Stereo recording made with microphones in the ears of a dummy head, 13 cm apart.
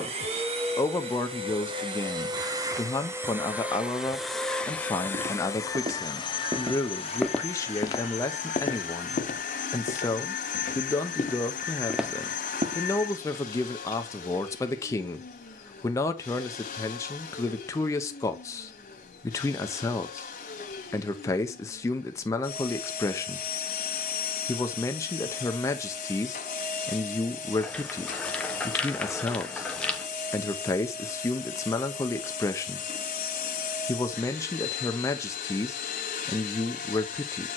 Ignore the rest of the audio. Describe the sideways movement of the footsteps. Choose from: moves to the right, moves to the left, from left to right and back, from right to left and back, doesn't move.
from right to left and back.